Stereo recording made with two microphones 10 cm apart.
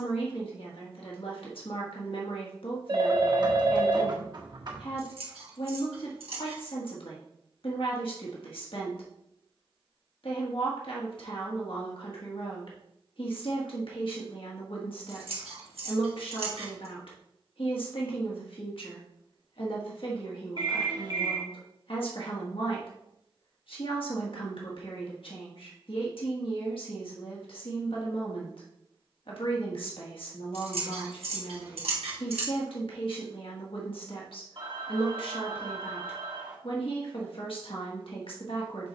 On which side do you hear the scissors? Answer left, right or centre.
right.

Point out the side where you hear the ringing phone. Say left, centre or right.
right.